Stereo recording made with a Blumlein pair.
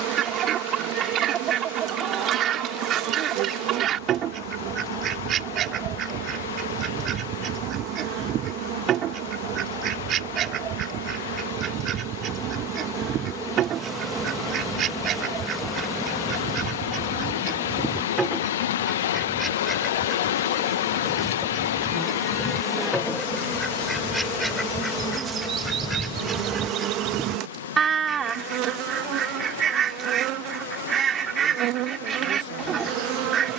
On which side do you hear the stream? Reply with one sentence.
You can hear the stream on the left.